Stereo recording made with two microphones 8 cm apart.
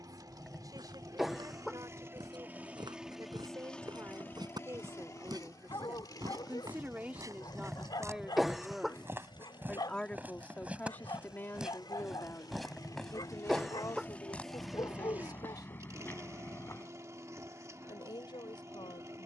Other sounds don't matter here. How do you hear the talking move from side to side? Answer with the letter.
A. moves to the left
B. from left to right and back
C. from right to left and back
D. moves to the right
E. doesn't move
A.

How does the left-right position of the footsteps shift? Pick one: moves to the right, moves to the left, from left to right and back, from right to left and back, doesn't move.
moves to the left.